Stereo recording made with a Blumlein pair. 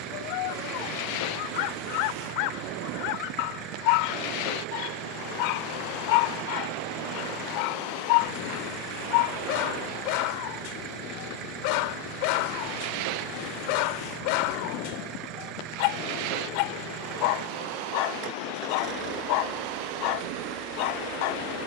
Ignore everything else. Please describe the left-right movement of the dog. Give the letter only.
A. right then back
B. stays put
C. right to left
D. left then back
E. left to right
B.